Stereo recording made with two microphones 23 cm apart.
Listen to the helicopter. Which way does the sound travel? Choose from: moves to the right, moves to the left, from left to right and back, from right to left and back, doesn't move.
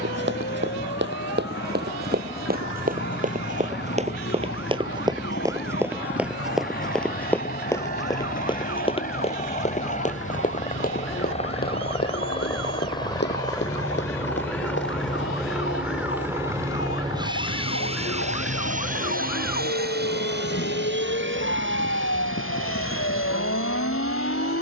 moves to the right.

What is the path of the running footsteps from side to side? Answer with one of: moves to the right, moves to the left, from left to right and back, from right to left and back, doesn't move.
moves to the left.